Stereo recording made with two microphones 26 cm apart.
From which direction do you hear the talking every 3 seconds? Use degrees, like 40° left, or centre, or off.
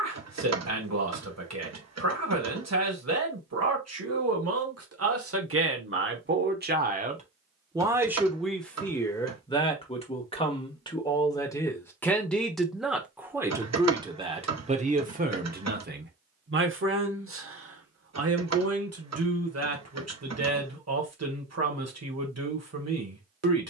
80° right, 70° right, 20° right, 20° left, 10° right, 40° right, 70° right, 70° right.